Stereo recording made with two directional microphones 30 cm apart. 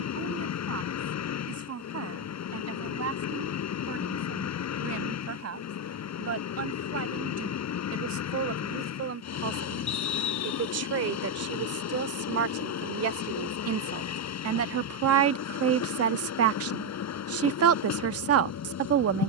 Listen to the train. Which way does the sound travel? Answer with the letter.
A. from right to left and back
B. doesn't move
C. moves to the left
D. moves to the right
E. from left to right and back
B.